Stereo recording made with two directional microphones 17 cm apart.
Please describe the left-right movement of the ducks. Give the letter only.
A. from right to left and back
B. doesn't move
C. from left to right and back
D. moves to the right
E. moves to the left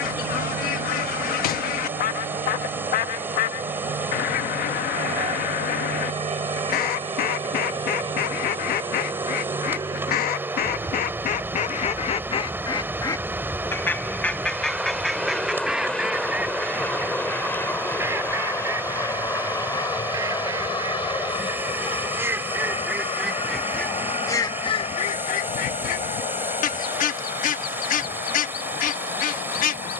C.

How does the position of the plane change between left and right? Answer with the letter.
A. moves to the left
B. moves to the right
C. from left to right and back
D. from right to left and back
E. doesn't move
A.